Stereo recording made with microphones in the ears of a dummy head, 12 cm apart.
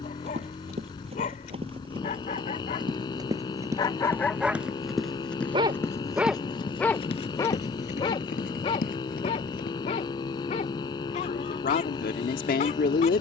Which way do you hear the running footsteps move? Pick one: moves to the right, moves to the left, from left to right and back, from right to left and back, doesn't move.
moves to the left.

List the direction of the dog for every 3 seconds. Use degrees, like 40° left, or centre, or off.
50° left, centre, 20° left, 50° left, 50° left.